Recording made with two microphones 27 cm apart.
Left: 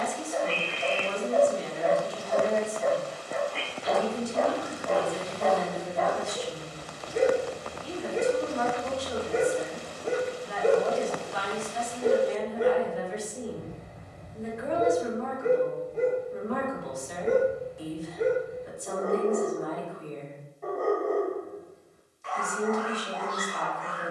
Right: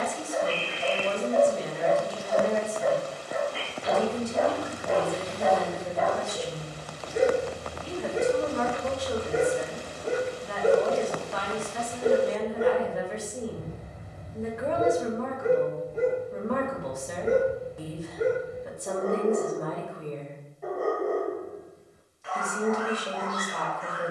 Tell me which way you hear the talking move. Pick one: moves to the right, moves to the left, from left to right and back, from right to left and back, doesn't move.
doesn't move.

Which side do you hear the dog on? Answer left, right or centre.
centre.